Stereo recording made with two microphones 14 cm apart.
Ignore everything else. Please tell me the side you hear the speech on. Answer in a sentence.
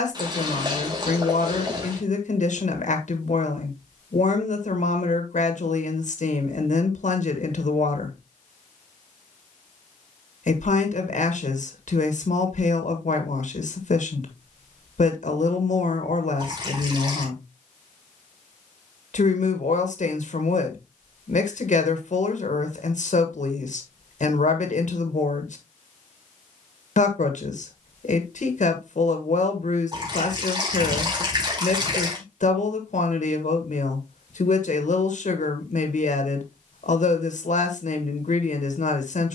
You can hear the speech on the left.